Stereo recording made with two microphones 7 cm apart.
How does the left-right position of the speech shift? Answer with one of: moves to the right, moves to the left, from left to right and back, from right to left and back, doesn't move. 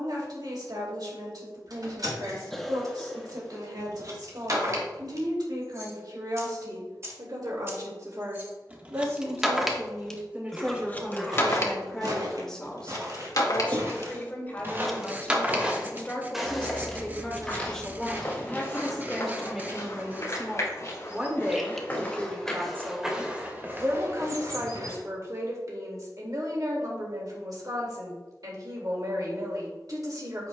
from right to left and back.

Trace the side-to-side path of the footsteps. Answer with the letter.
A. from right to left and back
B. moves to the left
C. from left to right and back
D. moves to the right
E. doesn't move
A.